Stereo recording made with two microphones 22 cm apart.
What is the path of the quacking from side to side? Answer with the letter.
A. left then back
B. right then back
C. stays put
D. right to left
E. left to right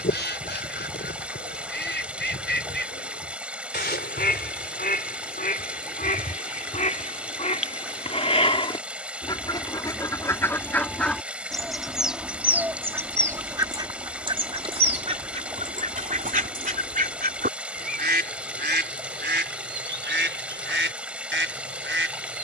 E.